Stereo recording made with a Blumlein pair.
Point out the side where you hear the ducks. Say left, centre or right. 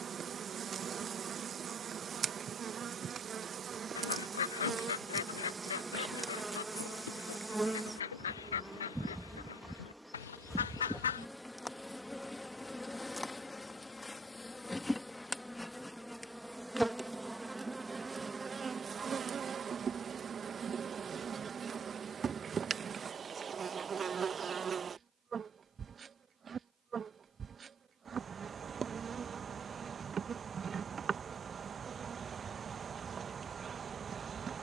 left.